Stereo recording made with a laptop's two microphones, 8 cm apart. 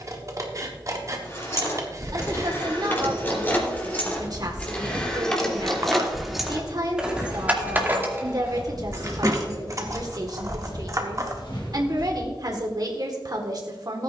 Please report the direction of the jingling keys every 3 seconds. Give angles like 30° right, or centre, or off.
30° left, 20° left, 20° right, 40° right, off.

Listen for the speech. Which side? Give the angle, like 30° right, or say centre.
50° right.